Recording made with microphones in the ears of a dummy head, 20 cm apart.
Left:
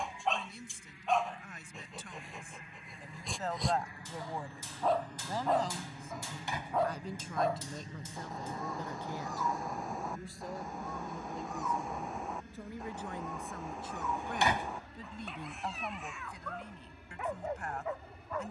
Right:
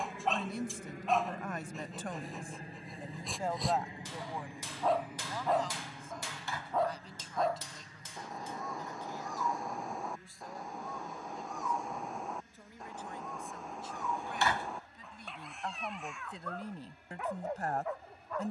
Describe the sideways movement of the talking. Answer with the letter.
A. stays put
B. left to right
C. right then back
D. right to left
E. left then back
E.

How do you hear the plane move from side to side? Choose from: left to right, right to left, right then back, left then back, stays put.
right to left.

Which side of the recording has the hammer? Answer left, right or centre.
right.